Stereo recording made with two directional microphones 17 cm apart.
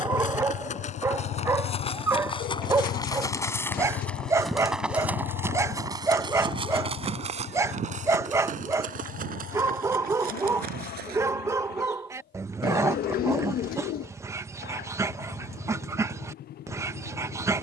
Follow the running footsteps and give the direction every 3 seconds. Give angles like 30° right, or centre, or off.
40° left, centre, 40° right, 60° right, off, off.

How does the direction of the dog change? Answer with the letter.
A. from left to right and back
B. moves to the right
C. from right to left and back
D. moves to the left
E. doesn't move
E.